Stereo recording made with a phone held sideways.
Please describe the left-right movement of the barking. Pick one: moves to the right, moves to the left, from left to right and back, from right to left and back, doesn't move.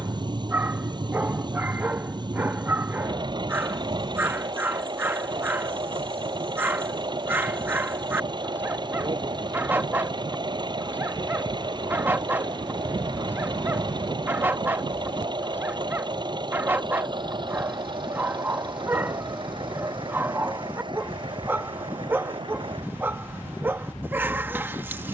doesn't move.